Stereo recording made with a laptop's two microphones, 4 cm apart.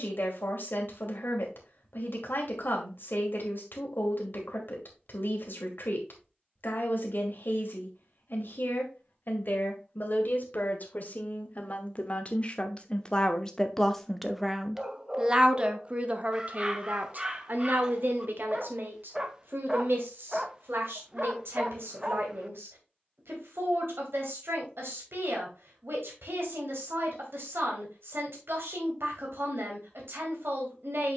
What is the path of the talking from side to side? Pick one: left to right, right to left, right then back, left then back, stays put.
left to right.